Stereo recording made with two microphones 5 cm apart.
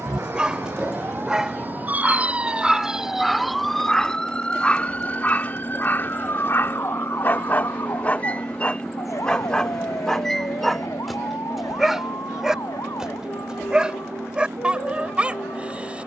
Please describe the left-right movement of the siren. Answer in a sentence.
In this clip you hear the siren travel towards the left.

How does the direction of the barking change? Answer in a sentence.
You can hear the barking go left and come back.